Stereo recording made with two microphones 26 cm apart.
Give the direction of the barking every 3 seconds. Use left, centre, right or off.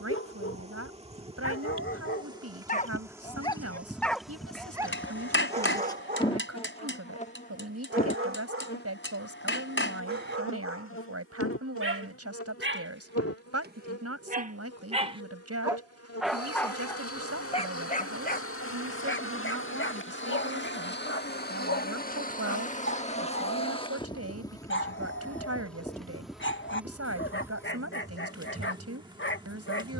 left, centre, right, right, right, centre, left, left, left, left.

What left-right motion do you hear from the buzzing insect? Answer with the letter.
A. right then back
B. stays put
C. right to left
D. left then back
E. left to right
D.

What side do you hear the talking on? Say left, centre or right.
right.